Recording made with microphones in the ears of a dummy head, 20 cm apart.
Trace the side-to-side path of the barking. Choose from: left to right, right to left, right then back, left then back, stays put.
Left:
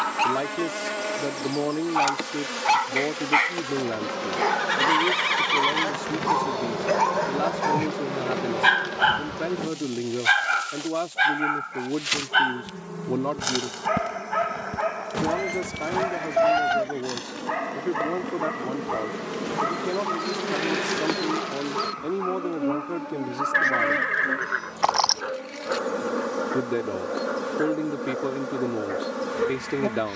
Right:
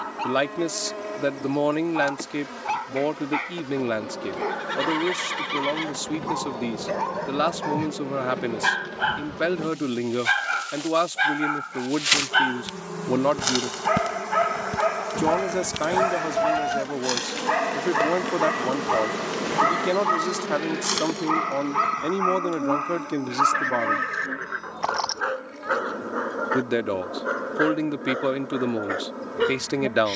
left to right.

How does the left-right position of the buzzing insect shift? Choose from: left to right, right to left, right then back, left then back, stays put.
right then back.